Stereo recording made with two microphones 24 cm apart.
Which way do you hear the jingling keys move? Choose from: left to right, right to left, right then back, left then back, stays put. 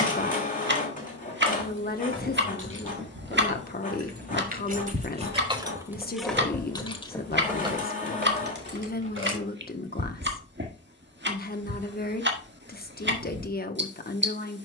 left then back.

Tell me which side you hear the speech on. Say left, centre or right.
left.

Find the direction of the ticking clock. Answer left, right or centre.
right.